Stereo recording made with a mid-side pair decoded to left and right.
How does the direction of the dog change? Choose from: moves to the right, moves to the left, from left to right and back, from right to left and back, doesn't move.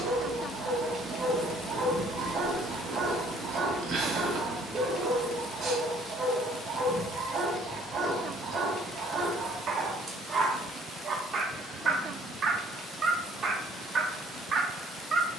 doesn't move.